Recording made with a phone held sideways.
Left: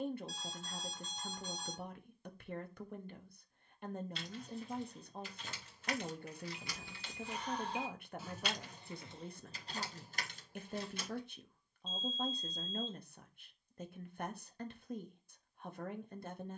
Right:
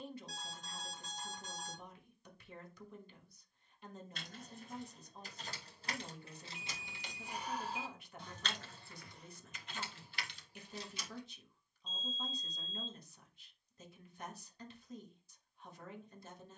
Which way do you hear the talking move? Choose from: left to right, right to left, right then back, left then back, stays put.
stays put.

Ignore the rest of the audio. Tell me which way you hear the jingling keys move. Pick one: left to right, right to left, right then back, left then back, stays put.
right to left.